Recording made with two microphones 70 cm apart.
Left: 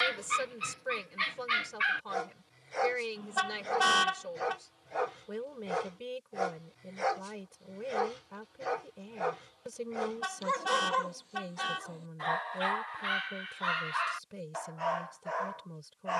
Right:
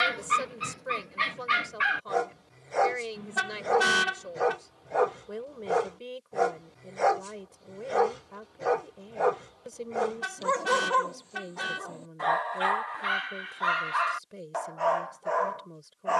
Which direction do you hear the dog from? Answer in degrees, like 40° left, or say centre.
70° right.